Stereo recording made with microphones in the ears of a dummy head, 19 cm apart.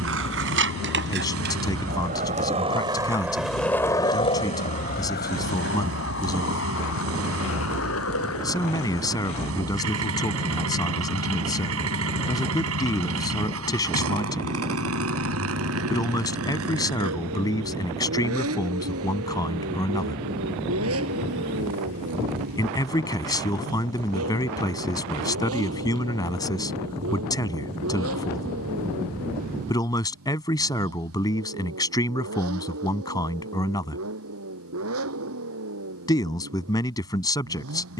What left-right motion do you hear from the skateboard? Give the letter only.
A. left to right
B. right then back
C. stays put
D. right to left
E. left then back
D.